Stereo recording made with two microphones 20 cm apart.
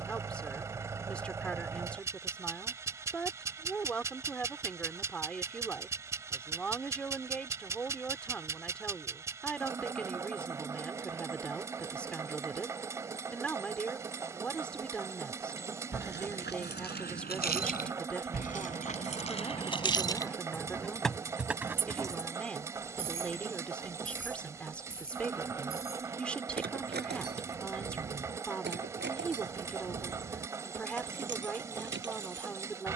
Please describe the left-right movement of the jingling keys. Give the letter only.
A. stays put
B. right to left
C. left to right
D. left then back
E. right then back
C.